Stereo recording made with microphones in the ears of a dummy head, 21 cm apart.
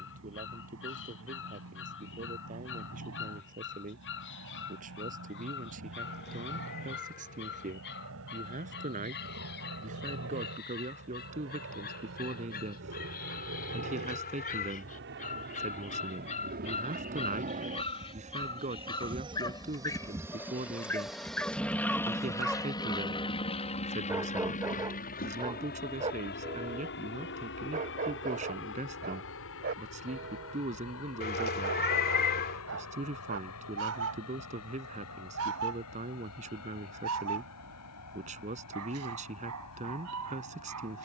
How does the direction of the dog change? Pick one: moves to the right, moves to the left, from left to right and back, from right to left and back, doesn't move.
moves to the right.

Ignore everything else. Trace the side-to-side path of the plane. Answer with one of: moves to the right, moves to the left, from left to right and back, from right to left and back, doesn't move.
moves to the left.